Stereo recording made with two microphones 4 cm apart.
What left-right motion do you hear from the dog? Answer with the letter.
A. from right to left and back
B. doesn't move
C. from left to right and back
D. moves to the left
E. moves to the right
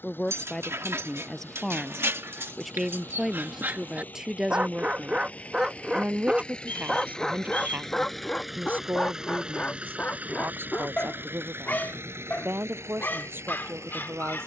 D.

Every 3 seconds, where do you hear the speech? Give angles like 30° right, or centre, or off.
10° left, 10° right, 30° right, 50° right, 50° right.